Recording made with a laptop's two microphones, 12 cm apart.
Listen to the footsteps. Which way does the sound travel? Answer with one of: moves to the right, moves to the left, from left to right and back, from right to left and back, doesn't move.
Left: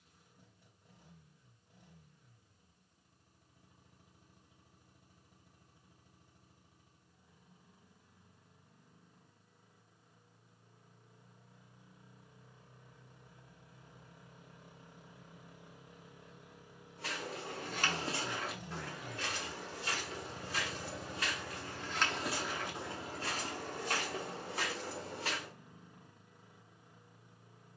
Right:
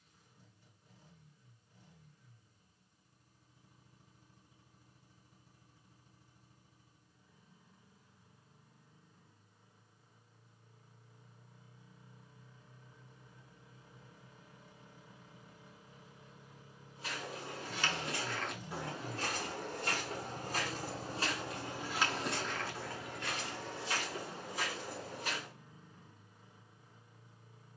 from left to right and back.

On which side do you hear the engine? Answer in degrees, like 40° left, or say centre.
70° left.